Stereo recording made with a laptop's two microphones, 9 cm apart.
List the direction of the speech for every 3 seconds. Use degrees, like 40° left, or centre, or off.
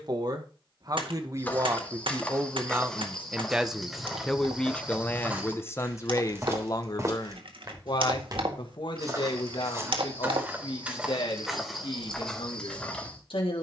30° right, 10° left, 50° left, 70° left, 70° left.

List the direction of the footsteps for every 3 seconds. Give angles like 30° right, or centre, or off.
10° left, 10° right, 40° right, 20° right, 10° left.